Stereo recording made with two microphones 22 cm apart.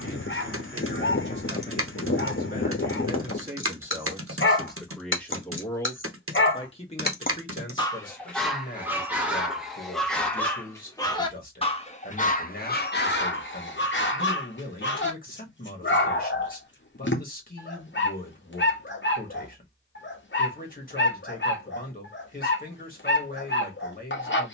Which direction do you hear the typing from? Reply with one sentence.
In this clip you hear the typing on the right.